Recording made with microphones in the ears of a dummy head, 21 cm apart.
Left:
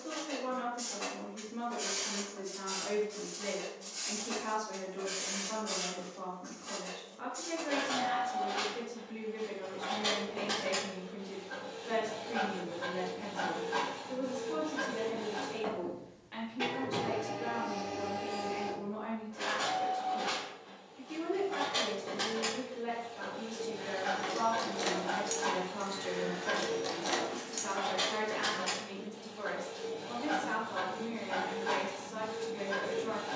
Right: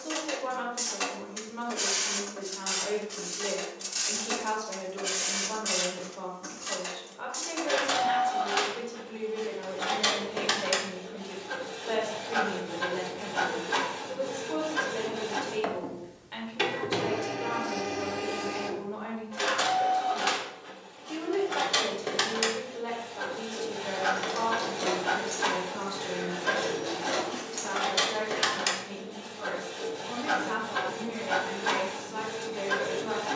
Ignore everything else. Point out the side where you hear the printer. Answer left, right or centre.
right.